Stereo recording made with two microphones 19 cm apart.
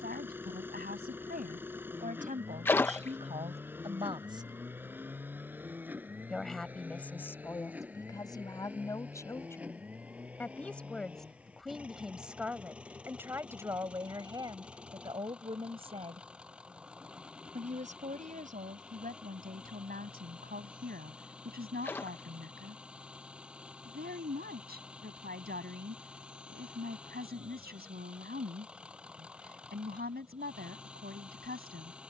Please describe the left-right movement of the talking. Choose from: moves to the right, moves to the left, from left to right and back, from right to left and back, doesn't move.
from right to left and back.